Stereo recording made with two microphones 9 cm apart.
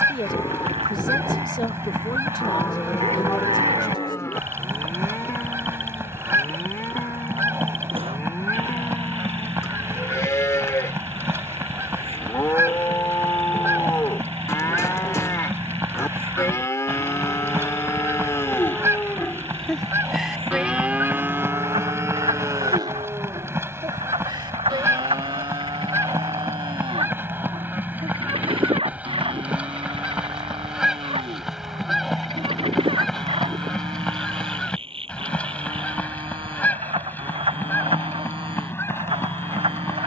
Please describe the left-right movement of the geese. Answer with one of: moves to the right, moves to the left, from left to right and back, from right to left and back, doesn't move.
moves to the left.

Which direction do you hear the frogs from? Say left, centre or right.
right.